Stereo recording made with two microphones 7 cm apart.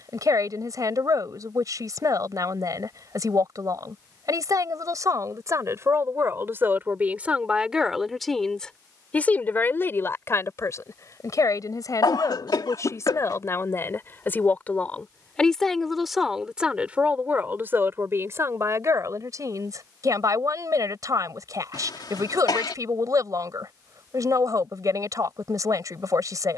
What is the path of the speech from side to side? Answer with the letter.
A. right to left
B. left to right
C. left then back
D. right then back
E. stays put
C.